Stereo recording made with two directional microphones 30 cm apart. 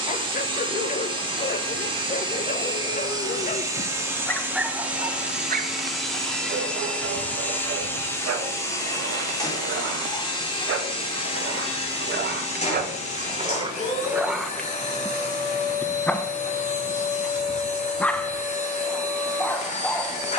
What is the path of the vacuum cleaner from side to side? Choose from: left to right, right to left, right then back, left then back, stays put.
right to left.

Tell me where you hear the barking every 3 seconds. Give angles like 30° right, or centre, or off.
30° left, centre, 50° right, 50° right, 20° right, centre, centre.